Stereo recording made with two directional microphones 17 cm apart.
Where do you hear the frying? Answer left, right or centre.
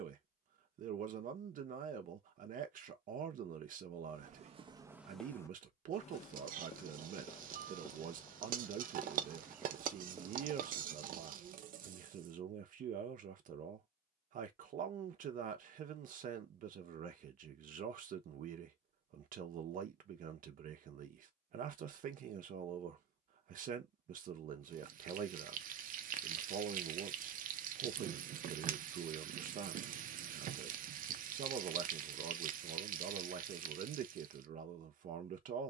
right.